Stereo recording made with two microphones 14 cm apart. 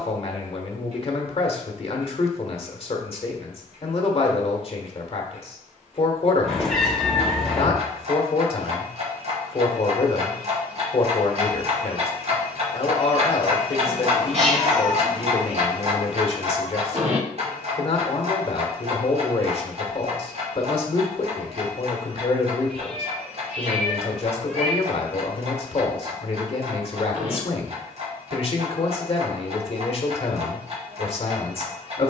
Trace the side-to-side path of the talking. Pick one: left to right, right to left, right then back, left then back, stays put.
stays put.